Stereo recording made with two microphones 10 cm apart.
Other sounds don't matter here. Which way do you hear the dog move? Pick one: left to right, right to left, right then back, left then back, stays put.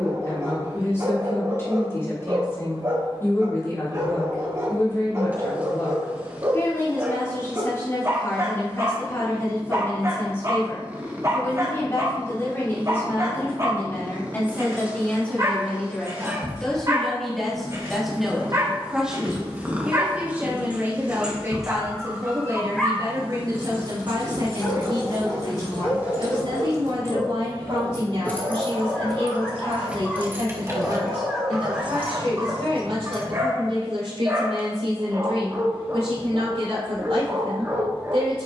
left then back.